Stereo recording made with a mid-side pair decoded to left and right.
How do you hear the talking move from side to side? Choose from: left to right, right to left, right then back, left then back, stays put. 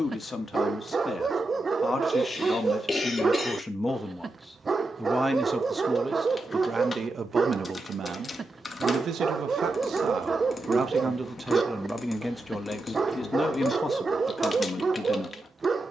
right then back.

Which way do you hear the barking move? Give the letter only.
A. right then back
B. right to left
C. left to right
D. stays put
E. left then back
D.